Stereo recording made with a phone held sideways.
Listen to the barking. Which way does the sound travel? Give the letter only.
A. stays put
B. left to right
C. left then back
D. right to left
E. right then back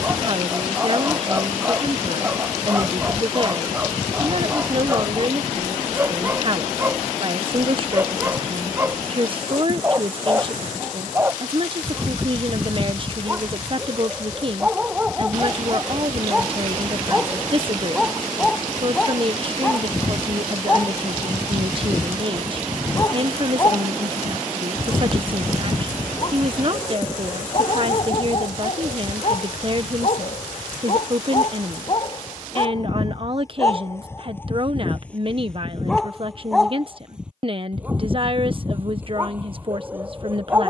C.